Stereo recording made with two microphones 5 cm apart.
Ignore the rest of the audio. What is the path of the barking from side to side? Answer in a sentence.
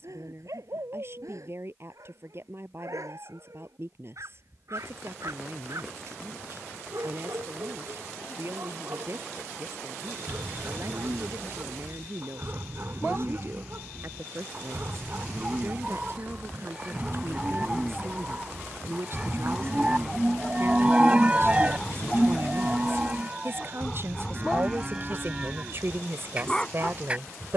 You can hear the barking move from right to left.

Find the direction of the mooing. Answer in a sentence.
In this clip you hear the mooing on the right.